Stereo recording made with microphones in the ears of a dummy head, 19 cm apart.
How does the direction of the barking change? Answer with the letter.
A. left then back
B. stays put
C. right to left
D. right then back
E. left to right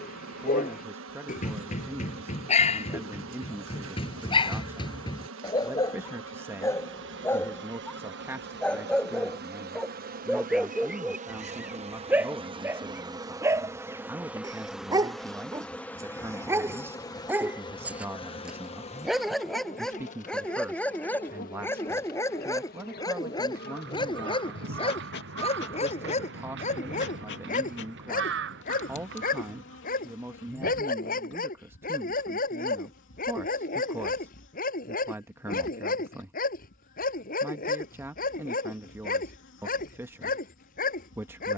D.